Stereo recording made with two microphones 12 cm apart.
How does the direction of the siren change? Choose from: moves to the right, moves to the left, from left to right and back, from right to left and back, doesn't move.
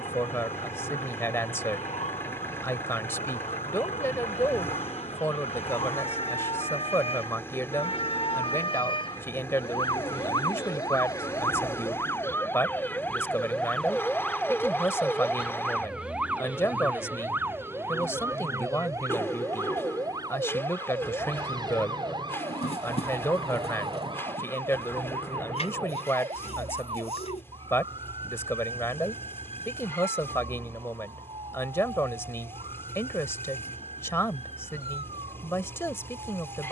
moves to the right.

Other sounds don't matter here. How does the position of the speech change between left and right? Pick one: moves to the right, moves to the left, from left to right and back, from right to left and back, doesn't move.
doesn't move.